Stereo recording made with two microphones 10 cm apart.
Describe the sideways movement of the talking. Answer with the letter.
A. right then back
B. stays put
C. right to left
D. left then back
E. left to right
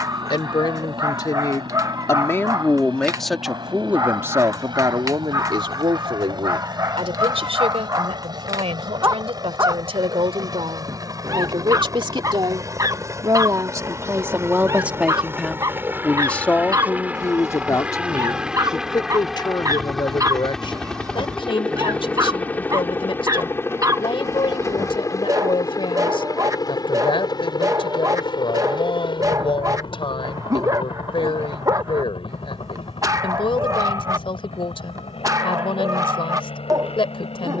A.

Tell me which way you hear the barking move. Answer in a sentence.
In this clip you hear the barking stay in one place.